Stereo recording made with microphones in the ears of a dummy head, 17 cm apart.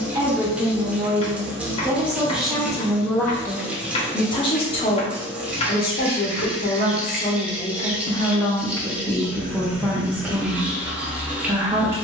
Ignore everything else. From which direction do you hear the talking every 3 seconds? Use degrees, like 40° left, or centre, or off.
10° right, 30° left, 40° left, 10° right.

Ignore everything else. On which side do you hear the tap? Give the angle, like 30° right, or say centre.
10° right.